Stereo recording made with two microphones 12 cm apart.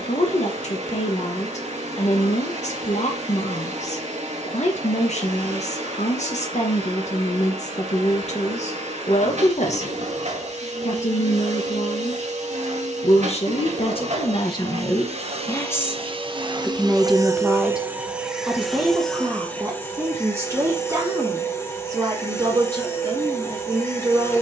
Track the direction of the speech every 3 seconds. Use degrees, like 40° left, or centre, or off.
70° left, 70° left, 70° left, 70° left, 50° left, 10° left, 20° right, 30° right.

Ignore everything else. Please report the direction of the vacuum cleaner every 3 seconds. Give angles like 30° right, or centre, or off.
80° right, 80° right, 80° right, 80° right, 70° right, 40° right, 10° left, 20° left.